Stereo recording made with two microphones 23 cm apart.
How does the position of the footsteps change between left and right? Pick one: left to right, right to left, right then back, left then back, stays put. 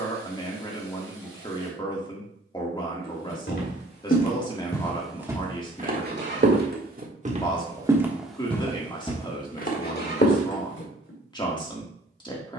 right then back.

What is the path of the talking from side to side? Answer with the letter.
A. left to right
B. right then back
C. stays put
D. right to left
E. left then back
C.